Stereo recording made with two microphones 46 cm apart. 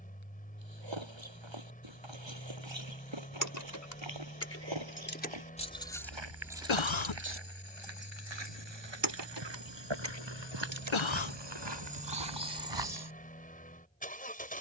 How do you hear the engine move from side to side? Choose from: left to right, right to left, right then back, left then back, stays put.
stays put.